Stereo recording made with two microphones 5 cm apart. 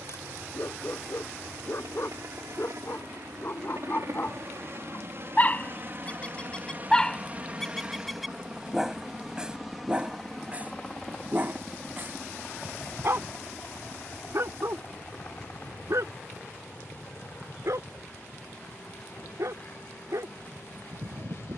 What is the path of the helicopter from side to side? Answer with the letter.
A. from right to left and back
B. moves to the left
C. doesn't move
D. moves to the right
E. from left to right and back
B.